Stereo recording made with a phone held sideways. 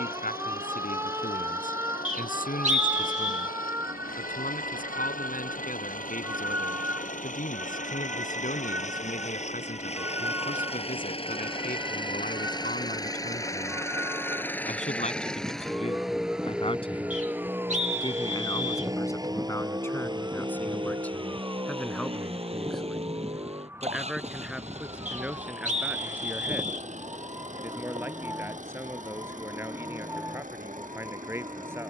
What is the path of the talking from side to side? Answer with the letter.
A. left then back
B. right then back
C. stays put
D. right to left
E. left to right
E.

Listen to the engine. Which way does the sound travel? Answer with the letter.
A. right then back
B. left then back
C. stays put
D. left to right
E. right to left
D.